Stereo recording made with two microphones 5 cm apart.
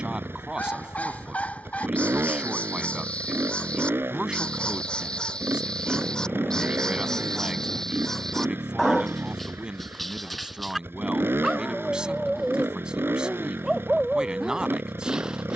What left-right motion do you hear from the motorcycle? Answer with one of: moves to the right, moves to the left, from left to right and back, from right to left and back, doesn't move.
doesn't move.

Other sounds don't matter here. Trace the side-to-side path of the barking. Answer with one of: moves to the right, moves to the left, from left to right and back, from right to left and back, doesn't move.
moves to the right.